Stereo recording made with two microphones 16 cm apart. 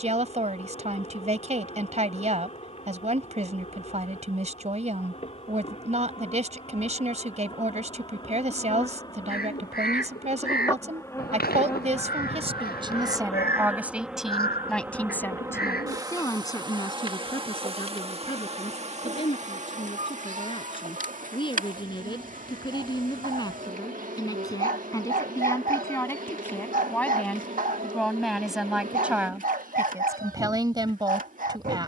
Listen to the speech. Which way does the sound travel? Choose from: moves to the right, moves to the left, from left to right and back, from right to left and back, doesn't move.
from right to left and back.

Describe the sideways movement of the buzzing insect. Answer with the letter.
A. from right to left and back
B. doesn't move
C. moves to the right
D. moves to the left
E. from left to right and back
C.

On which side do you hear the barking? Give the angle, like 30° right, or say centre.
60° right.